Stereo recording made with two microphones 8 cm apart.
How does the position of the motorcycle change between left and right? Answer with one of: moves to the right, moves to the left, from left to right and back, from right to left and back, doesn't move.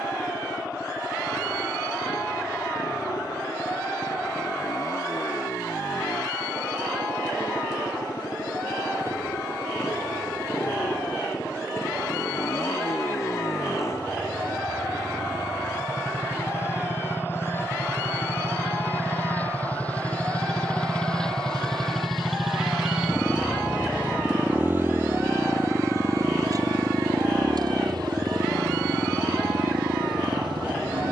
moves to the right.